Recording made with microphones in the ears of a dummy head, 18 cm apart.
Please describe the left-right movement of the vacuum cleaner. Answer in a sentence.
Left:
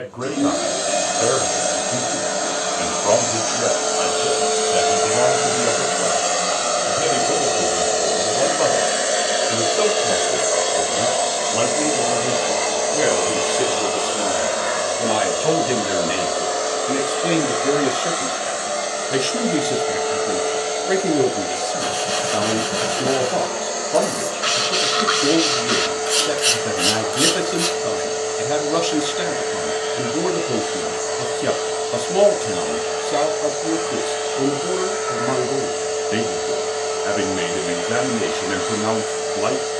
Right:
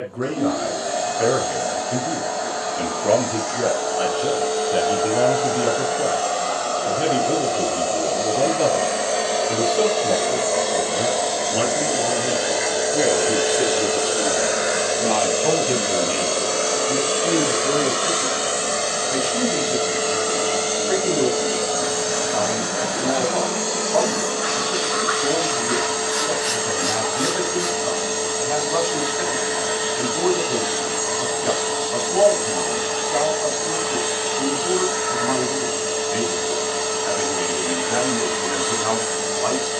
In this clip you hear the vacuum cleaner go from the left side to the right.